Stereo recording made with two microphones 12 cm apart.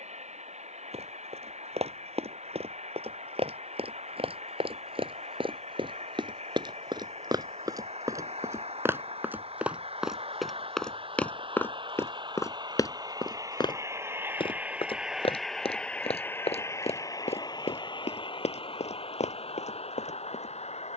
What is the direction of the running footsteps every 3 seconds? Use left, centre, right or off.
right, right, right, centre, left, left, left.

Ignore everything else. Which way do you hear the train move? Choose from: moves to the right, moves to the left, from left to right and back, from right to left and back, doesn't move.
moves to the left.